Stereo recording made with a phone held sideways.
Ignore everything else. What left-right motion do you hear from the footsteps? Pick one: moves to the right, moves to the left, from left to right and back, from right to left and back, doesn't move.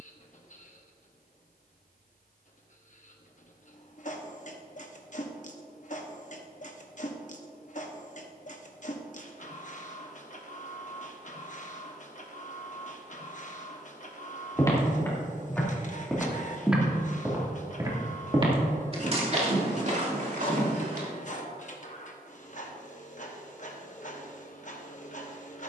moves to the right.